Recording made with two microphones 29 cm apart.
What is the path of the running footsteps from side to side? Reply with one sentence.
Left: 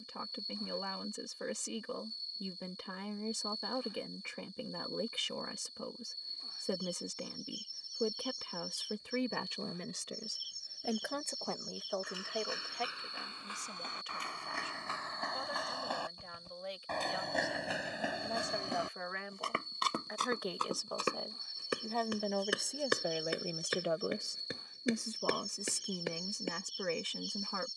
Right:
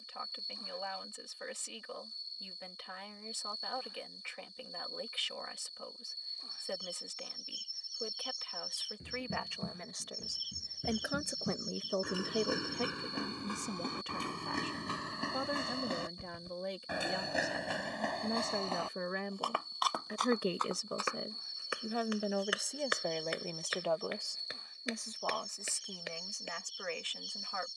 You can hear the running footsteps go from the right side to the left.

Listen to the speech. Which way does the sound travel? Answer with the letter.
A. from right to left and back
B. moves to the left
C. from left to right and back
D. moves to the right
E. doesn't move
C.